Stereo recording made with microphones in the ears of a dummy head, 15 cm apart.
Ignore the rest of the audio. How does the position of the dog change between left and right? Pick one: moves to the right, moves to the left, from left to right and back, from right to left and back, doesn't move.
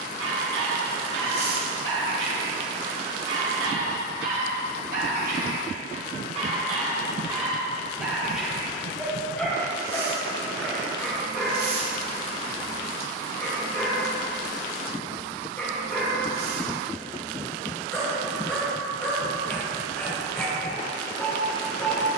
moves to the left.